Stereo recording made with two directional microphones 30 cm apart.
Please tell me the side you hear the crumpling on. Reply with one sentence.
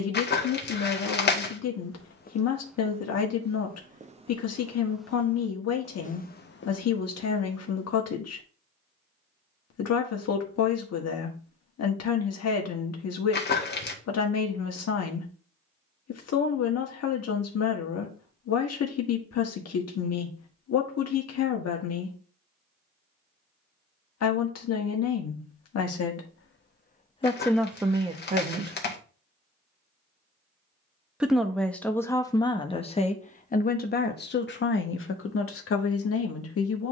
In this clip you hear the crumpling on the left.